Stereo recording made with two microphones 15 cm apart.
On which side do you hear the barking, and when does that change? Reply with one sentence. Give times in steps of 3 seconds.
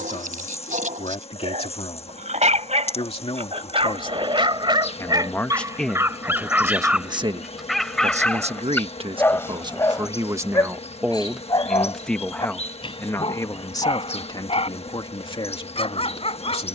You can hear the barking on the right from 0 s, in the centre from 6 s and on the left from 9 s.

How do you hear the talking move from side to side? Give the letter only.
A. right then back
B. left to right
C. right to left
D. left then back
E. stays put
A.